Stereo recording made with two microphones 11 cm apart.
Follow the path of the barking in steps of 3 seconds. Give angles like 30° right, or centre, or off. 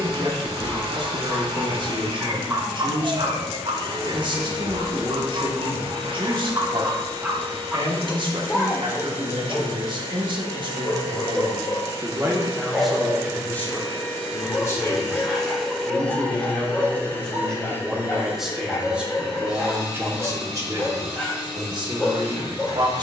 10° right, 50° right, 20° right, 10° left, 10° left, 10° left, 10° left, 10° left.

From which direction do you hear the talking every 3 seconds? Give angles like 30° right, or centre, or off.
40° right, 40° right, 40° right, 40° right, 10° left, 10° left, 20° right, 40° right.